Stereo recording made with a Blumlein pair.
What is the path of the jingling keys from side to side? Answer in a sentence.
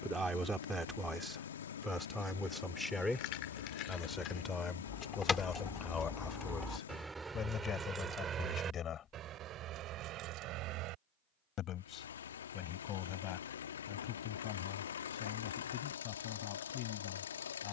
In this clip you hear the jingling keys travel towards the right.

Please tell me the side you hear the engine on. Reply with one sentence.
You can hear the engine on the left.